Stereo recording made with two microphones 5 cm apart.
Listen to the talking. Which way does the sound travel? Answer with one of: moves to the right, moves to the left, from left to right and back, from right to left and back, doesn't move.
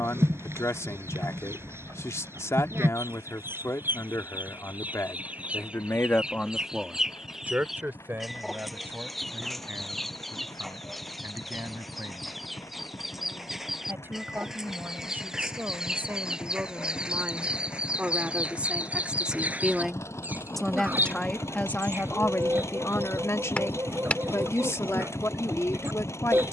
from left to right and back.